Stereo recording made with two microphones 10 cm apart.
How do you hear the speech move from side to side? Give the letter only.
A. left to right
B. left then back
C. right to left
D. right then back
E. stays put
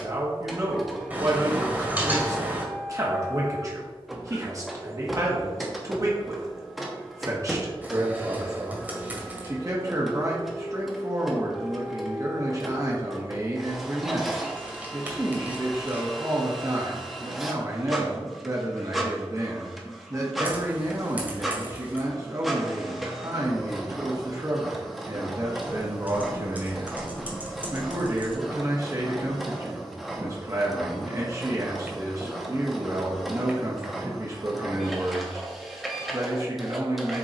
E.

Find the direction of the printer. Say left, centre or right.
centre.